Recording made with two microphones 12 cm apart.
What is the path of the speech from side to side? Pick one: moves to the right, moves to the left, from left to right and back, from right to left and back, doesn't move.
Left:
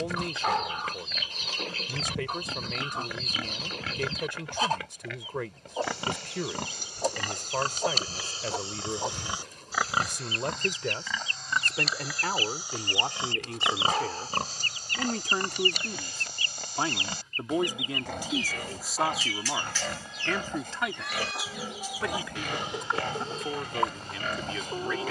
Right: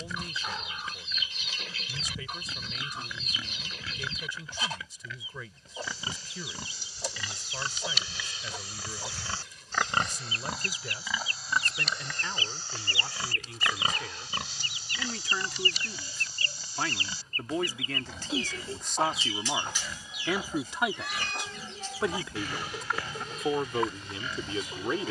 moves to the right.